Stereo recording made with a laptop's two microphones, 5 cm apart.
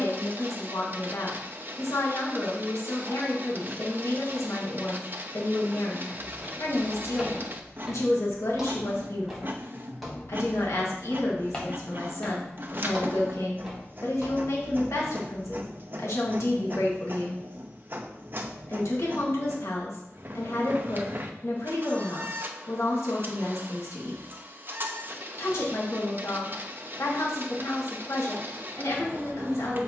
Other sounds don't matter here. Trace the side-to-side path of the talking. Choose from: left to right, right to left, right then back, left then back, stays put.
stays put.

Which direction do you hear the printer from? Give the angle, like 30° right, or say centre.
40° right.